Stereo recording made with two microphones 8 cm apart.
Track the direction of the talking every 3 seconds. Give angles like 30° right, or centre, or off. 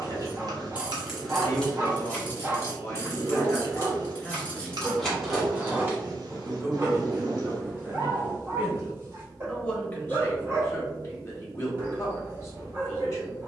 40° left, 10° left, 30° right, 30° left, 40° left.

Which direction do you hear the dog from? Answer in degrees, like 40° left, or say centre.
30° right.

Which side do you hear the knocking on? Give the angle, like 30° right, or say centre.
10° left.